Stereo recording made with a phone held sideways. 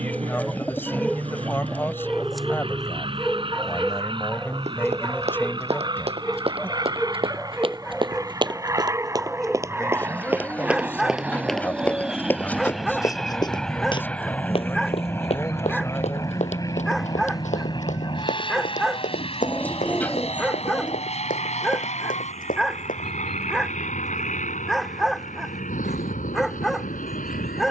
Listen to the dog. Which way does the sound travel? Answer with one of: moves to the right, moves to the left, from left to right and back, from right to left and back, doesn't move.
doesn't move.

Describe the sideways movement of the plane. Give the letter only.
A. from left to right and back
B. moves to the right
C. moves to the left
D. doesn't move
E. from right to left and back
C.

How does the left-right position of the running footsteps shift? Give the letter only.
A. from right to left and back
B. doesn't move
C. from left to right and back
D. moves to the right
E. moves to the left
E.